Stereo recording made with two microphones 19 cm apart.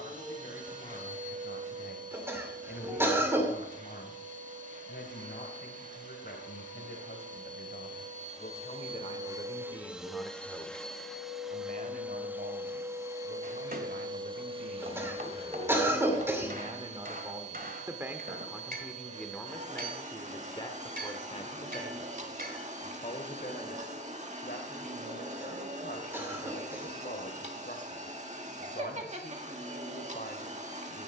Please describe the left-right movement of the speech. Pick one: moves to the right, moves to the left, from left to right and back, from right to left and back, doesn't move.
from left to right and back.